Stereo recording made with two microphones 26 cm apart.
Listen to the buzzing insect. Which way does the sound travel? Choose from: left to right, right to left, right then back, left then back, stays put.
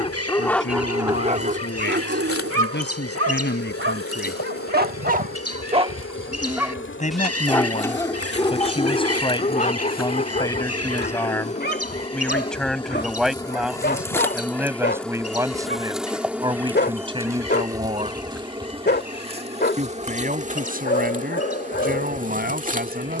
left to right.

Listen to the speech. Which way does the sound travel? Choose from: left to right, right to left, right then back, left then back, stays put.
left to right.